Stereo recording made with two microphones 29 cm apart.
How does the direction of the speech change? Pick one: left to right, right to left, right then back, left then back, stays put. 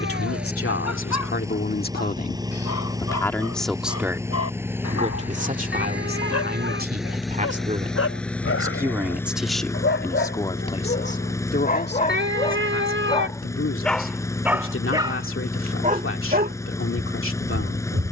right then back.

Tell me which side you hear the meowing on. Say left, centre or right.
right.